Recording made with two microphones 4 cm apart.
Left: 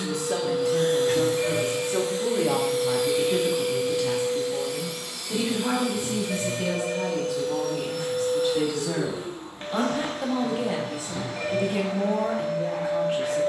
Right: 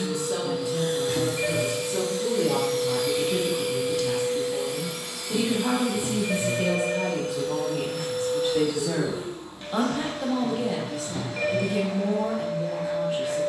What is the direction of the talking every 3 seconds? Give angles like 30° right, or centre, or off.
50° left, 10° left, 30° right, 20° left, 50° left.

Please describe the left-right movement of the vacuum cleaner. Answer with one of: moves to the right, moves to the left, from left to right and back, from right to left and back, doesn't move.
from left to right and back.